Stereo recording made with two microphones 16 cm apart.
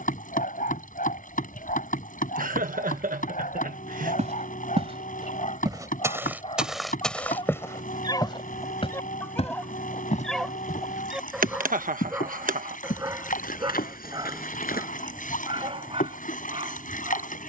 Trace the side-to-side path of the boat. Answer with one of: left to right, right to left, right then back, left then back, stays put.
stays put.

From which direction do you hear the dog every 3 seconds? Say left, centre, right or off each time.
left, left, left, centre, right, right.